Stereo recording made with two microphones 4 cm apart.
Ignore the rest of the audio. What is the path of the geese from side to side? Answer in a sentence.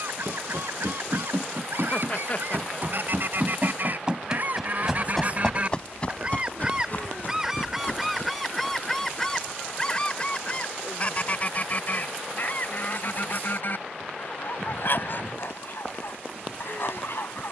In this clip you hear the geese travel towards the left.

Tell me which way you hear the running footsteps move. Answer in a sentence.
You can hear the running footsteps move from right to left.